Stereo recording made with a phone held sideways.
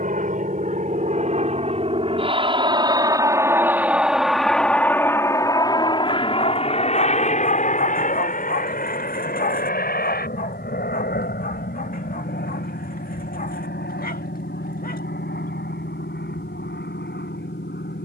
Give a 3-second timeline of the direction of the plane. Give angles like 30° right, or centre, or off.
40° right, centre, 40° left, 60° left, 70° left, 70° left.